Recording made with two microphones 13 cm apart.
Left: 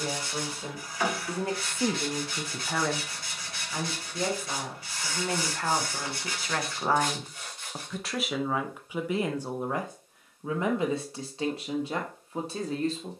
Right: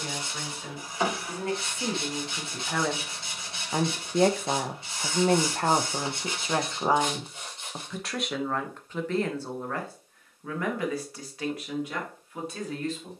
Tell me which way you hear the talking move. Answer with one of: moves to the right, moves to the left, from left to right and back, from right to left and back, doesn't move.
from left to right and back.